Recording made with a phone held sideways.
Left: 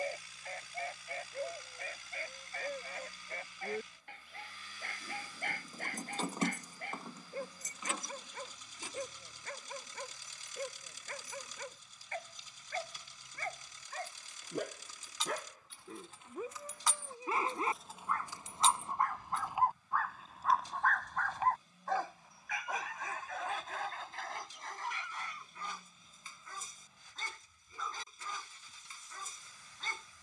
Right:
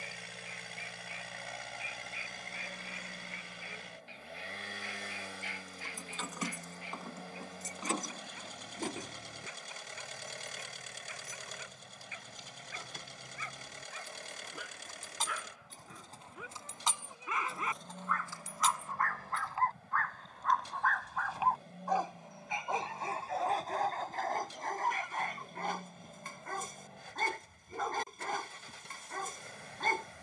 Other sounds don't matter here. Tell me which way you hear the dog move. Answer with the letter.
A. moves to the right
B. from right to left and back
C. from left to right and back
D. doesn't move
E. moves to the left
A.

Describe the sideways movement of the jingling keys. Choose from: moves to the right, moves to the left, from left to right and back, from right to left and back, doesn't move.
from left to right and back.